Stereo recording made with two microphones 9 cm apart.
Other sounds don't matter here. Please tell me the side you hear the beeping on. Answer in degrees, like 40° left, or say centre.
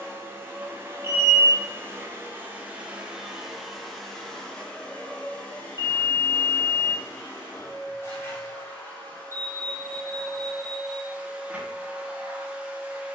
30° right.